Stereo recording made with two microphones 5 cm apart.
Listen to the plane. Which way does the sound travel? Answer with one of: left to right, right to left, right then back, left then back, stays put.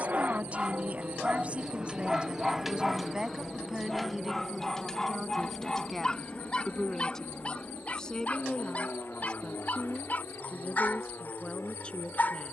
right to left.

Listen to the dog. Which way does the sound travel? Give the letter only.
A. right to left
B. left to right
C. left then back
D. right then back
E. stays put
A.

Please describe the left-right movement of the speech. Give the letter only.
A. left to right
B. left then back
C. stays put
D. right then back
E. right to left
E.